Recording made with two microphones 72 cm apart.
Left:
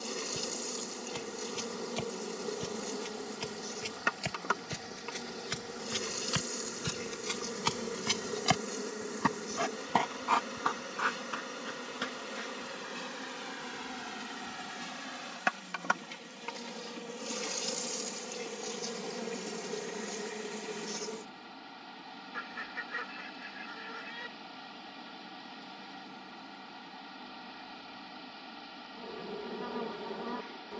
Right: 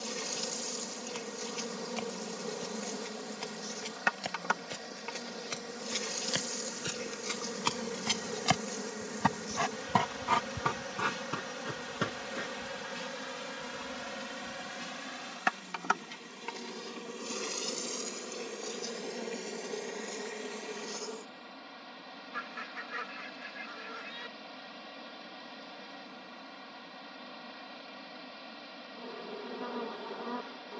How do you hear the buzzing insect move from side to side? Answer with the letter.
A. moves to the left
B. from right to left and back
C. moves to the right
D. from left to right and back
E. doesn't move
A.